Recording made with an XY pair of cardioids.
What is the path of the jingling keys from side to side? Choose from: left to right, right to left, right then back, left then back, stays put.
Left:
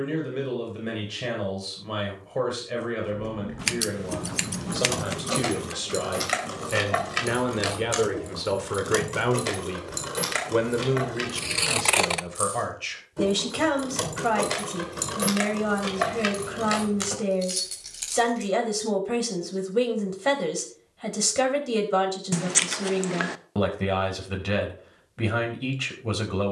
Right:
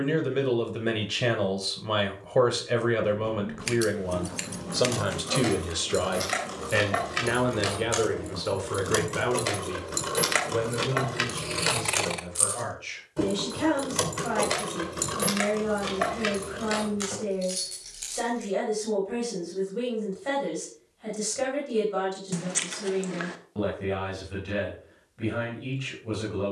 right then back.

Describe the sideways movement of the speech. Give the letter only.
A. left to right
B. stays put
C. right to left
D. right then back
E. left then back
C.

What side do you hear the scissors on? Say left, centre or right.
left.